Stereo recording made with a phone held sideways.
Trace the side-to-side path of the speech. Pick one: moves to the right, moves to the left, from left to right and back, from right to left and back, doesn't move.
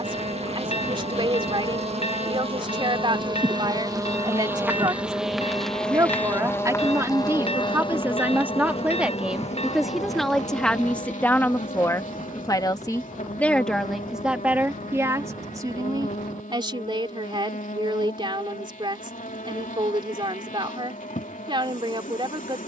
from right to left and back.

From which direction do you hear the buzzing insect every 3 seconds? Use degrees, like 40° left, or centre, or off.
40° right, 10° right, 30° left, 50° left, 60° left, 60° left, 60° left, 60° left.